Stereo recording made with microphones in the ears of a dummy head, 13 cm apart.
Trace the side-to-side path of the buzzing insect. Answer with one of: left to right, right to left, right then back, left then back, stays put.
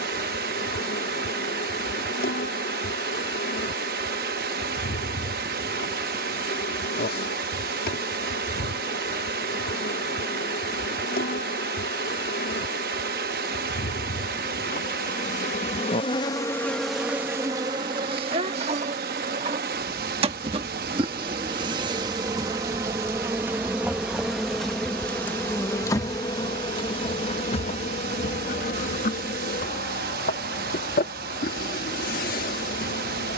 right then back.